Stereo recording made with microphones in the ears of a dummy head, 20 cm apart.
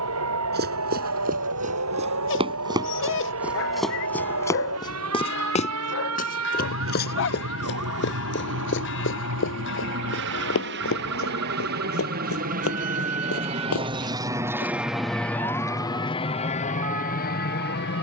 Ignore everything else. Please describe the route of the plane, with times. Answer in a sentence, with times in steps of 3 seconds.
You can hear the plane on the right from 0 s and on the left from 15 s.